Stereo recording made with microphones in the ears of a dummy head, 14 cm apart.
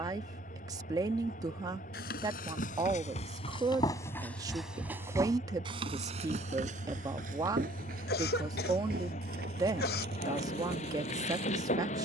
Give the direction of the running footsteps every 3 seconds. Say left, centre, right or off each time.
left, centre, right, right.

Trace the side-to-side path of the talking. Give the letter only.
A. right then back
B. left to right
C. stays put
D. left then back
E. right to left
C.